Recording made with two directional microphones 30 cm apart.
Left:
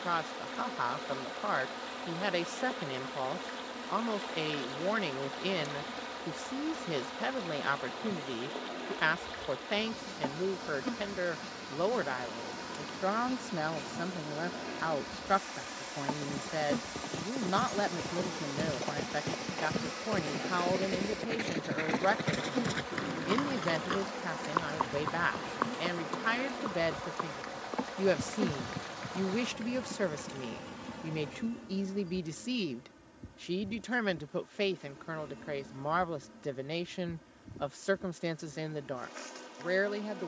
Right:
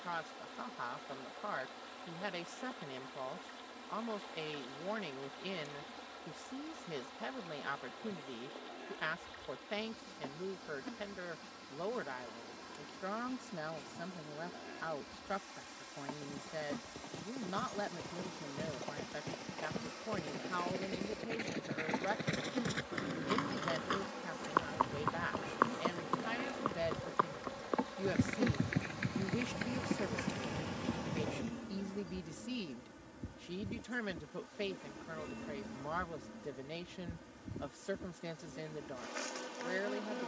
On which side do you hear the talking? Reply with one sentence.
You can hear the talking on the left.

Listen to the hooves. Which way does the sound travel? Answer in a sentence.
In this clip you hear the hooves travel towards the right.